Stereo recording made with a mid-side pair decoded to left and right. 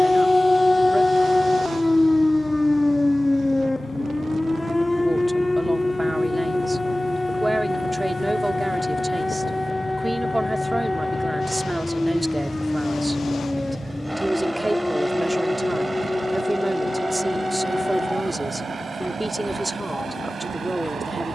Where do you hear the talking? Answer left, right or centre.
centre.